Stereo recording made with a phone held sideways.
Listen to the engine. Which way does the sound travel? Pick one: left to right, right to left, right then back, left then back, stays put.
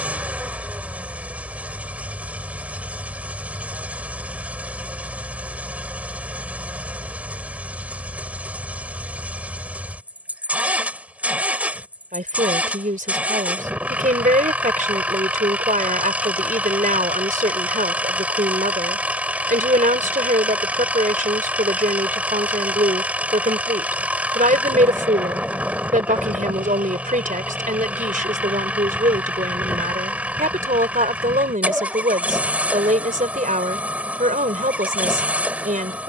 stays put.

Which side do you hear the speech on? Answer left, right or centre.
right.